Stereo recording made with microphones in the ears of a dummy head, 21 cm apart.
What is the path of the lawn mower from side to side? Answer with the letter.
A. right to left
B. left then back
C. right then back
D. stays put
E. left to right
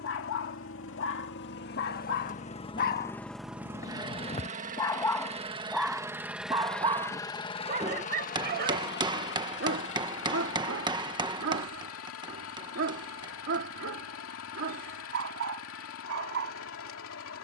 C.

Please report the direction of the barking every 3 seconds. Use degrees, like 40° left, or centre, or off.
60° left, 20° left, 30° right, 60° right, 60° right, 60° right.